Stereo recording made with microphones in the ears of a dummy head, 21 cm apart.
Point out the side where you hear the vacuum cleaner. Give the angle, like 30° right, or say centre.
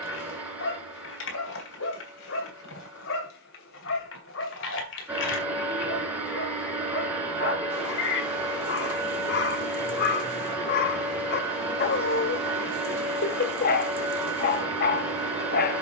10° right.